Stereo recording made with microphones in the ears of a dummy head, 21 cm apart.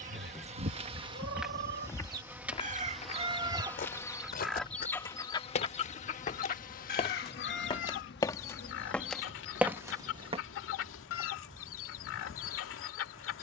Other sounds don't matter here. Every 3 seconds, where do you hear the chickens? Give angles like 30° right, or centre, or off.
40° right, centre, 50° left, 60° left, 60° left.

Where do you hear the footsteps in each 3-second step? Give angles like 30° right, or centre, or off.
centre, 40° left, 20° left, 10° right, off.